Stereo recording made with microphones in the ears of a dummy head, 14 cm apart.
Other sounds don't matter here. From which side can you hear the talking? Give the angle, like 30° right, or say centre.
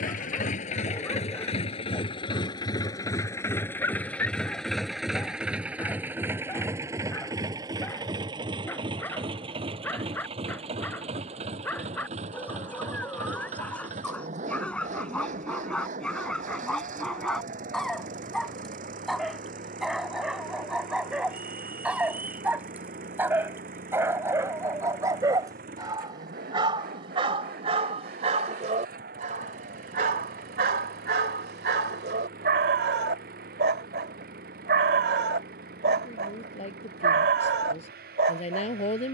40° left.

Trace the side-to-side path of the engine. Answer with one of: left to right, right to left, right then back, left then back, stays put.
left to right.